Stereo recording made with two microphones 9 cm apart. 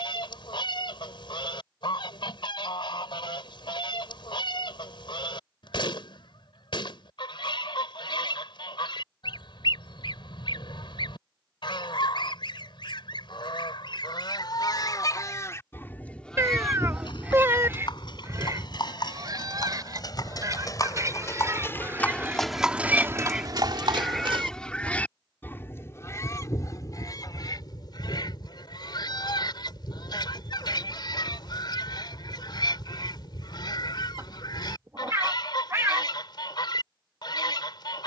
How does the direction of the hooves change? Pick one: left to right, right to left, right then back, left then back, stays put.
left to right.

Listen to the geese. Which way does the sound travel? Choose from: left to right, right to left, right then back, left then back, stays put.
right then back.